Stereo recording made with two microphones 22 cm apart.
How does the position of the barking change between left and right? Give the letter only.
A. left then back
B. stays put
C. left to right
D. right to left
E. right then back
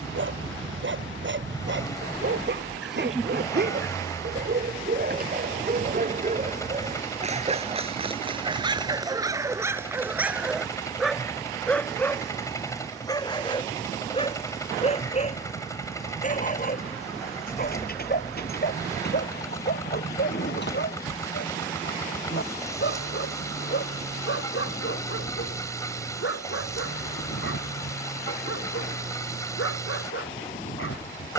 D.